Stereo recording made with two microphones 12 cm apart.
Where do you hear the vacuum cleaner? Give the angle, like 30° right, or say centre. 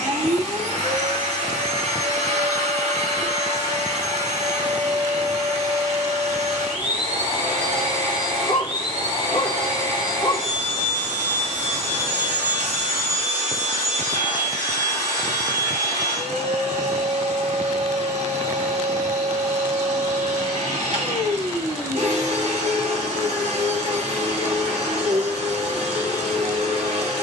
80° right.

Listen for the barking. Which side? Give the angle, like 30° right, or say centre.
40° left.